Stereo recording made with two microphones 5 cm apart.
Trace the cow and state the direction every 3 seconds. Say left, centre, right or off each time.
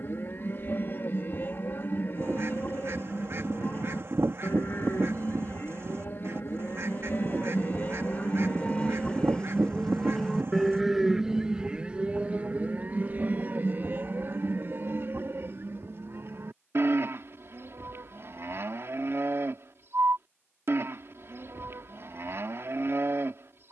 left, left, left, centre, right, right, right, right.